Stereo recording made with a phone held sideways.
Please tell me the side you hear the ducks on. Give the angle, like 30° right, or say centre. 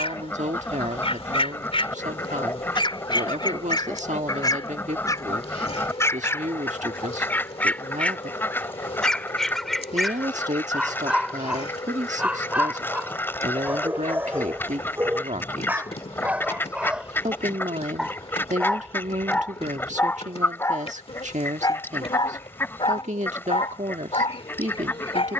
20° left.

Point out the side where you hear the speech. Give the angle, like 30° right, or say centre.
70° right.